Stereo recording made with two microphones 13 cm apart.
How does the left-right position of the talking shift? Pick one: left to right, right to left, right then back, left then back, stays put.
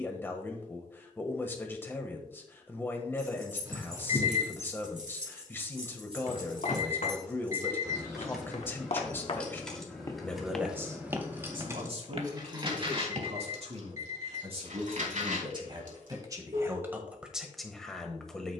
right then back.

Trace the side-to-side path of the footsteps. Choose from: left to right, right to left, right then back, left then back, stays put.
left to right.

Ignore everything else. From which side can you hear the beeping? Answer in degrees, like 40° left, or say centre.
30° right.